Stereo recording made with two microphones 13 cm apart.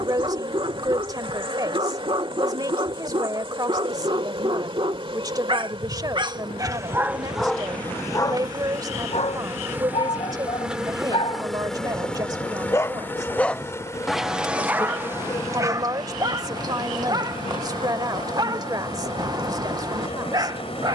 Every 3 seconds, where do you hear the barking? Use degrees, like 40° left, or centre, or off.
40° right, 40° right, centre, 50° left, centre, 30° right, 30° right.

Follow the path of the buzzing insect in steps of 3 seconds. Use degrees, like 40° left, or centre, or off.
40° right, 40° right, 30° right, 10° right, 20° left, 40° left, 50° left.